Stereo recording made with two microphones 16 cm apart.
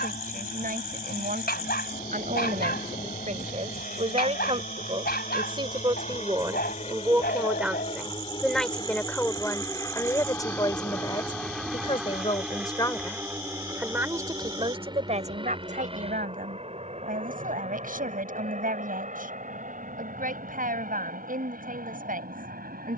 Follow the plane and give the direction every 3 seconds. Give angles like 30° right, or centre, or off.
70° left, 60° left, 40° left, 10° left, 20° right, 40° right, 50° right, 50° right.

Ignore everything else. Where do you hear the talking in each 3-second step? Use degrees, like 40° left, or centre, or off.
60° right, 40° right, 10° right, 20° left, centre, 60° right, 60° right, 60° right.